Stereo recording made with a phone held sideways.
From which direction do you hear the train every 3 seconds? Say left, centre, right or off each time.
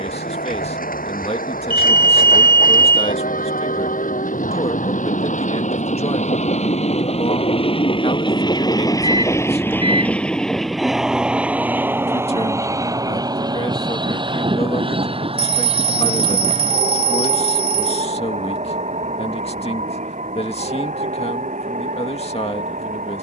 left, left, left, centre, right, right, right, right.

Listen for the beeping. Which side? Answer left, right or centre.
right.